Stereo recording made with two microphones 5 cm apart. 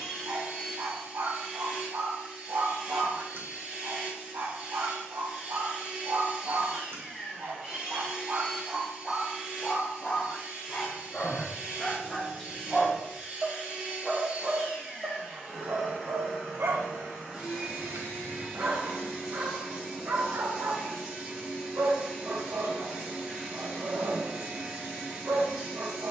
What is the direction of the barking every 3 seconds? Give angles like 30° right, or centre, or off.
60° right, 60° right, 50° right, 20° left, 10° right, 50° right, 60° right, 60° right, 60° right.